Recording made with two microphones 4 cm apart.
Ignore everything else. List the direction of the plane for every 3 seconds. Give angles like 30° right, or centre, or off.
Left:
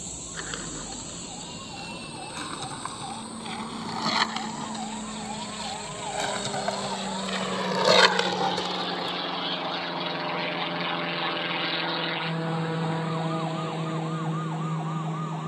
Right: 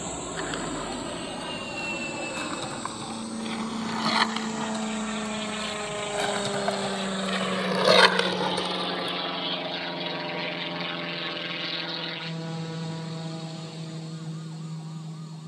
50° right, 40° right, 20° right, centre, 30° left.